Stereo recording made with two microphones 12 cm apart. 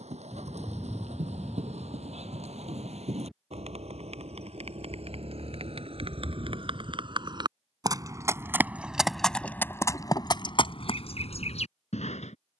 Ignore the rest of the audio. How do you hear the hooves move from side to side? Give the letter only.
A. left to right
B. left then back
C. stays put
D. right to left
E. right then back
D.